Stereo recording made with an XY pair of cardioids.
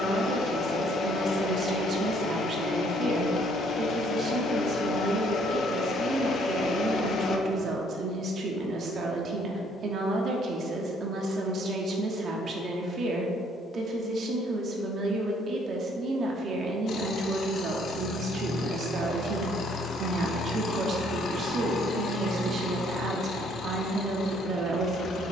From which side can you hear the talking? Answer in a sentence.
You can hear the talking on the right.